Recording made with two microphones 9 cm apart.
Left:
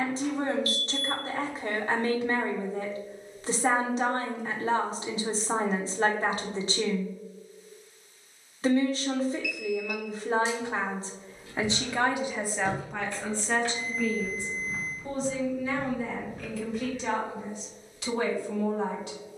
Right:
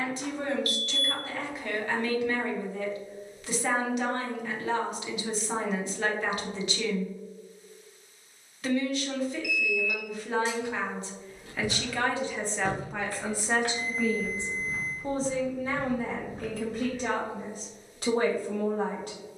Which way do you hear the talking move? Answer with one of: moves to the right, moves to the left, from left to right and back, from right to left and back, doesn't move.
moves to the right.